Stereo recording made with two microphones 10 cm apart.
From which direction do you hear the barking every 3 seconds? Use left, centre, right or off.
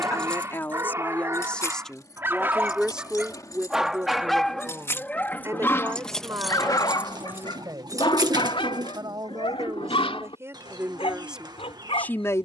right, centre, left, left.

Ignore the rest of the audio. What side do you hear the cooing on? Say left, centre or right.
right.